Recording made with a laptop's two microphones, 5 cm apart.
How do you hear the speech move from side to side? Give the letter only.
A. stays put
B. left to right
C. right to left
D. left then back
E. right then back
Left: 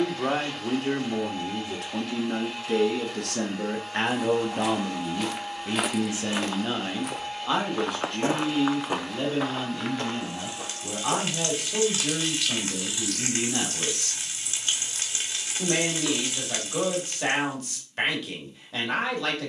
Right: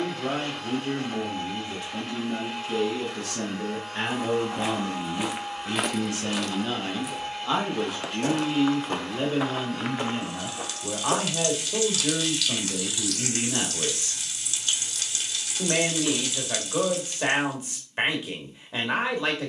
B.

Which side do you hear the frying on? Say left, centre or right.
left.